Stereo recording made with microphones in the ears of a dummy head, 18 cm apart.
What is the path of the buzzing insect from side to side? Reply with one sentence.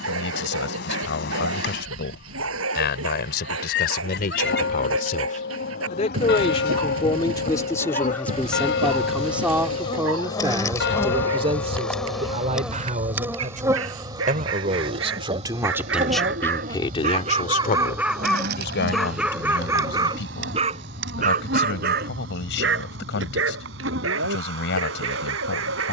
In this clip you hear the buzzing insect travel towards the right.